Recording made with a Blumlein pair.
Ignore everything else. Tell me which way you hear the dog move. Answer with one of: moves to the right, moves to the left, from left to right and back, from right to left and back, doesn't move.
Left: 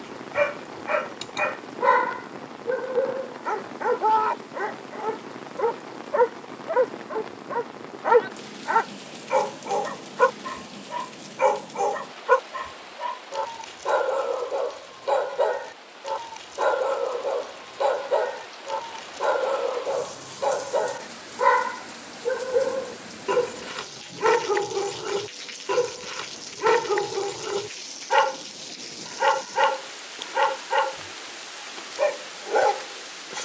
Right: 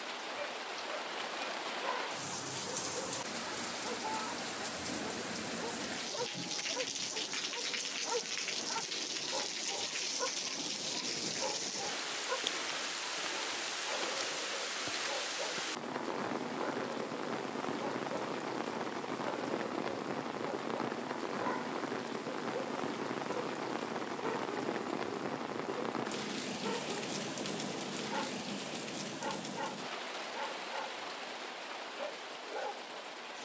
doesn't move.